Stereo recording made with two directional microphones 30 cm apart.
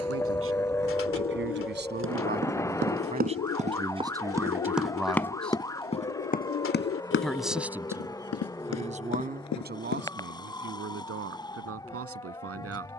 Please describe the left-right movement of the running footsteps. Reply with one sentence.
In this clip you hear the running footsteps travel towards the left.